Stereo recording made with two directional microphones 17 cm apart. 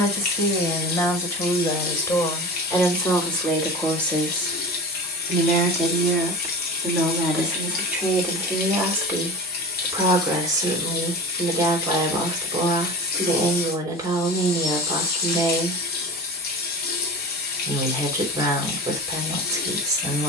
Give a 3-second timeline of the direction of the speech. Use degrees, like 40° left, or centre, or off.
20° left, 10° left, centre, 20° right, 20° right, 20° right, 20° right.